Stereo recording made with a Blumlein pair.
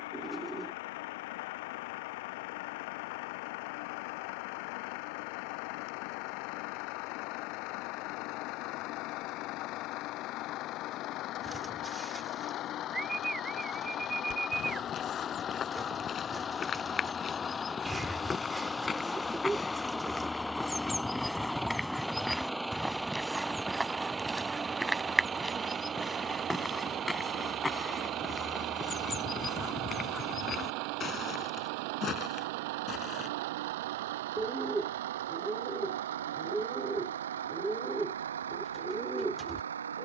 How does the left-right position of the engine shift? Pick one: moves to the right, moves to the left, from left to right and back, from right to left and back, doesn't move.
moves to the right.